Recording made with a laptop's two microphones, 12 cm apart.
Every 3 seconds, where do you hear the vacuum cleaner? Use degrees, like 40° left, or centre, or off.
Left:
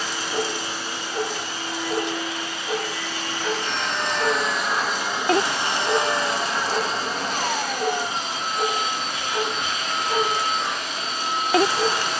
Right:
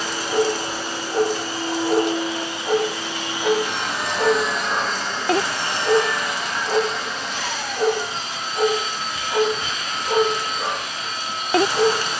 40° right, centre, 40° left, 70° left.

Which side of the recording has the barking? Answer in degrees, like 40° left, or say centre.
40° right.